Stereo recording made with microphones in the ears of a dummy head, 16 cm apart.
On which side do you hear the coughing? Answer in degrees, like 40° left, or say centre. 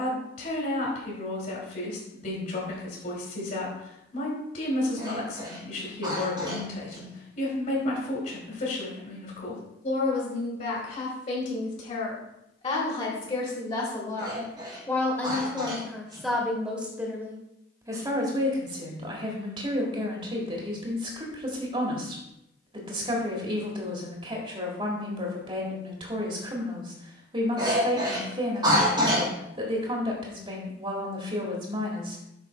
30° right.